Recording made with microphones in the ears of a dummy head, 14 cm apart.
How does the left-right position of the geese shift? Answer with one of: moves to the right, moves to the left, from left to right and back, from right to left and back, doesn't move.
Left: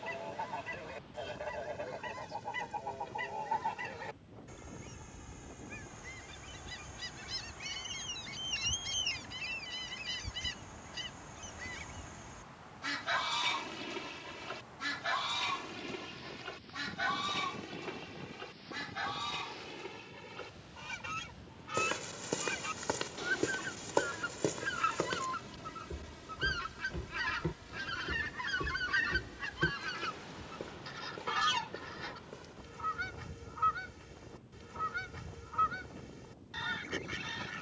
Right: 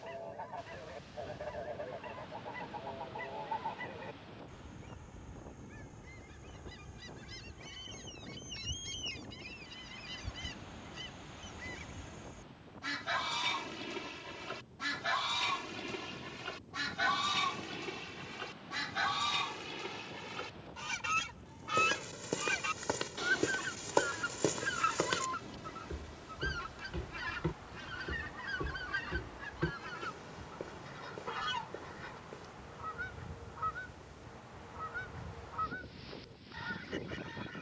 from left to right and back.